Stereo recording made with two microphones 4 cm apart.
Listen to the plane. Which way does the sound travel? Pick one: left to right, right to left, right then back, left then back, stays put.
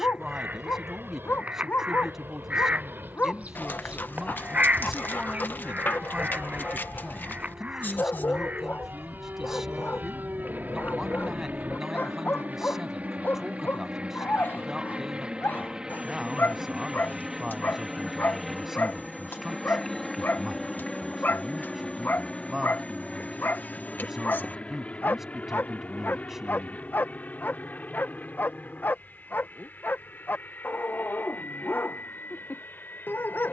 right to left.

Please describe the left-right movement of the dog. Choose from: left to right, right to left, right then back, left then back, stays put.
stays put.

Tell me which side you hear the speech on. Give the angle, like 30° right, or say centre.
10° right.